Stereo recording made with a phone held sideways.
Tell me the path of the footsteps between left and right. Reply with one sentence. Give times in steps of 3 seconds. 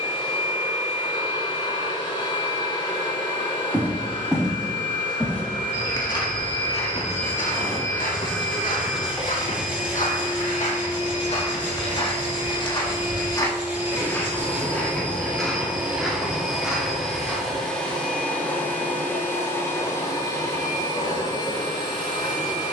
In this clip you hear the footsteps not at all from 0 s, in the centre from 3 s, on the left from 6 s, in the centre from 15 s and not at all from 18 s.